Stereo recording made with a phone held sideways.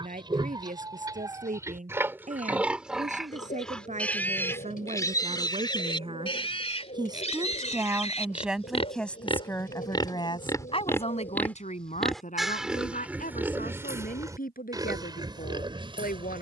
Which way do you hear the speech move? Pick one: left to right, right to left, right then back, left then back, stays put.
right to left.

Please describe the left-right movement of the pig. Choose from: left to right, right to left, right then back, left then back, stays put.
left then back.